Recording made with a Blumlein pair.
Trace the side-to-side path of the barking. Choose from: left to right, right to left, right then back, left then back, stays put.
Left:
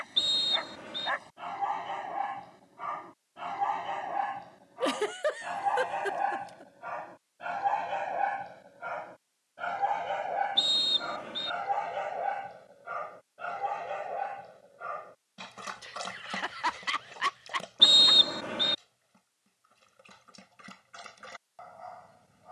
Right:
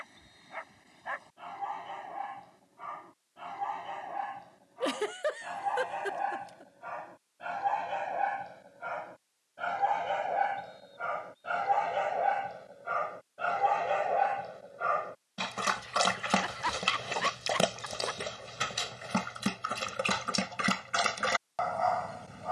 left to right.